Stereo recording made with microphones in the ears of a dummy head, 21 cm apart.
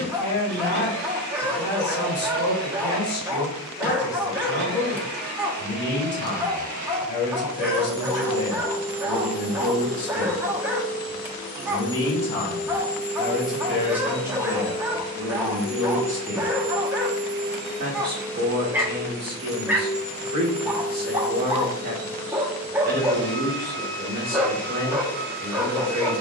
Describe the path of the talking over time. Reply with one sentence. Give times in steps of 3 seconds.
You can hear the talking on the left from 0 s, in the centre from 12 s and on the right from 15 s.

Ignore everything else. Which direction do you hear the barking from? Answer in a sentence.
You can hear the barking in the centre.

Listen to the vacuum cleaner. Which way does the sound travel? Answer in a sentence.
In this clip you hear the vacuum cleaner move from right to left and back again.